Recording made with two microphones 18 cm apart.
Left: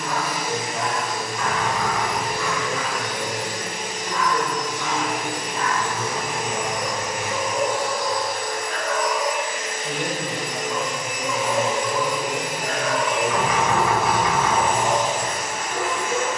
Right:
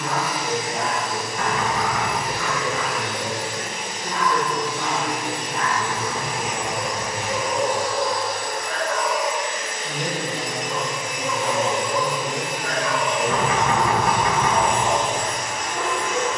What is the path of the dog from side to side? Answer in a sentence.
In this clip you hear the dog travel towards the left.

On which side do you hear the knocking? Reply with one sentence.
You can hear the knocking on the right.